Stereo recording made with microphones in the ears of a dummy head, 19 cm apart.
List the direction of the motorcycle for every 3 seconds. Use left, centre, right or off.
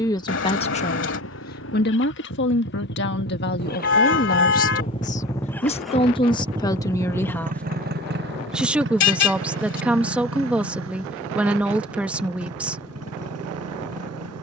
left, left, right, right, right.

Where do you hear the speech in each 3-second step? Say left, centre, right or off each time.
left, left, centre, centre, centre.